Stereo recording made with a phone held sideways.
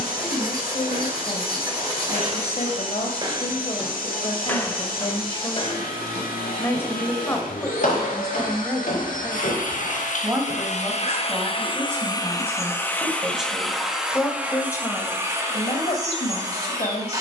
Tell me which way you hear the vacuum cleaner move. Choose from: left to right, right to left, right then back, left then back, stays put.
left to right.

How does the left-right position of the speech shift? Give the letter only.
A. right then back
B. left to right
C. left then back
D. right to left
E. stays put
A.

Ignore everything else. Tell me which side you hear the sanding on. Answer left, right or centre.
right.